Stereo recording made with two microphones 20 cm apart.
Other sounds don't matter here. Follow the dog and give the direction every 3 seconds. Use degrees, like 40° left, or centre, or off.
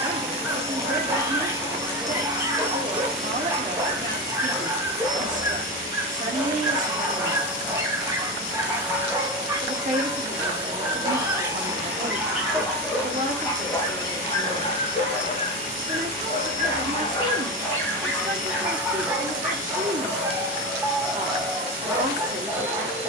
10° right, 10° right, 10° right, 10° right, 10° left, 30° left, 10° right, 10° right.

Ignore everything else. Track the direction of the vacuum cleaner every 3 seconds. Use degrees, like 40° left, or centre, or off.
20° right, 20° left, 40° left, 40° left, 40° left, 40° left, 40° left, 40° left.